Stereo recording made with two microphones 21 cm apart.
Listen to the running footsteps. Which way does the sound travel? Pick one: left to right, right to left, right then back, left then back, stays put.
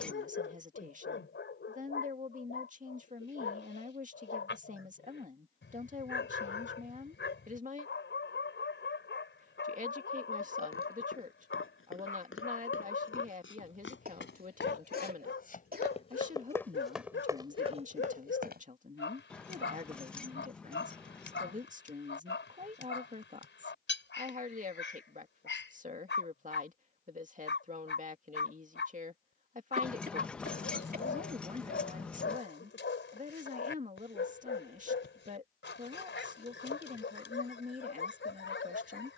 left to right.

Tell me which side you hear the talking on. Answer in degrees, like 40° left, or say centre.
40° right.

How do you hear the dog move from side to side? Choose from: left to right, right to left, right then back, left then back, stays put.
stays put.